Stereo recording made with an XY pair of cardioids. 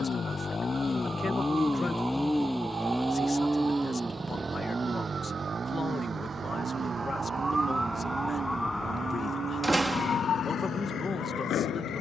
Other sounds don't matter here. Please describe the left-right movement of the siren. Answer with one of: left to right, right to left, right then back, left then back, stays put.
right to left.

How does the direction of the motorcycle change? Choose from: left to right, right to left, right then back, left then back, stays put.
left to right.